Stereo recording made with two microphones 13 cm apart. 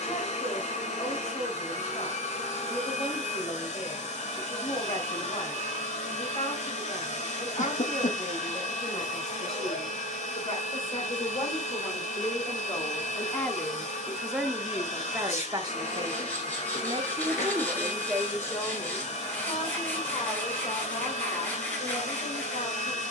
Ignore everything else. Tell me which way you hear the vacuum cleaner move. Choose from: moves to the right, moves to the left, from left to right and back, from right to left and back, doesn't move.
doesn't move.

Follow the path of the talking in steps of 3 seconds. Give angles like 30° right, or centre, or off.
60° left, 60° left, 60° left, 50° left, 10° left, 30° right, 40° left, 60° left.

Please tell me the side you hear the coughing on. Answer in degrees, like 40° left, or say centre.
80° left.